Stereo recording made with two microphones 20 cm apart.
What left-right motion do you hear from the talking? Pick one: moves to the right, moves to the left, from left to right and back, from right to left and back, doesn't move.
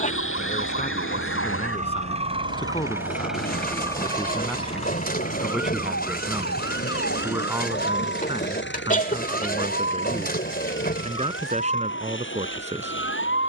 moves to the right.